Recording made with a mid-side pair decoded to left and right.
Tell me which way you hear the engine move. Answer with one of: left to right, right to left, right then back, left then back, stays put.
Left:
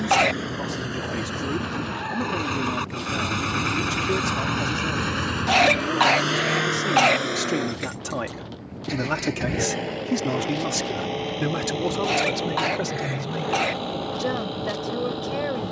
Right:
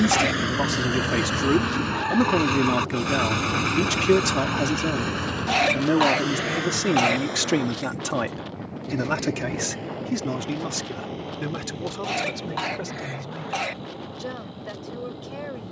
right to left.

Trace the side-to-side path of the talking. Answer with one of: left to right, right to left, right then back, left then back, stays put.
right to left.